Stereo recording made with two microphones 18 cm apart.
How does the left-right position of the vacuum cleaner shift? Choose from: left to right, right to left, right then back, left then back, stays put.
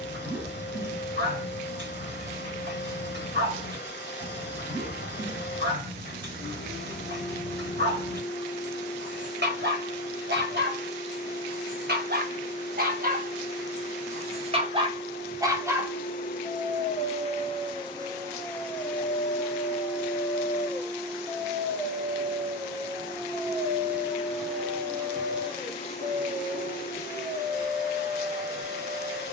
right then back.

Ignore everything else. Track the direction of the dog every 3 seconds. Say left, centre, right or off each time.
right, right, right, right, right, centre, left, centre, right, right.